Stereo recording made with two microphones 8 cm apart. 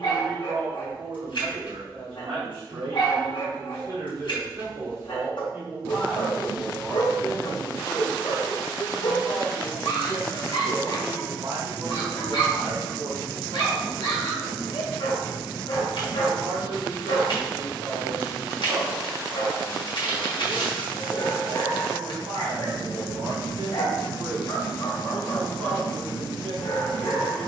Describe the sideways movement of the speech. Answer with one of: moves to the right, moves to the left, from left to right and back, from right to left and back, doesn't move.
from right to left and back.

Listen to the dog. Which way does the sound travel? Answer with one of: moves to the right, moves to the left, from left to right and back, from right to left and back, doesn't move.
doesn't move.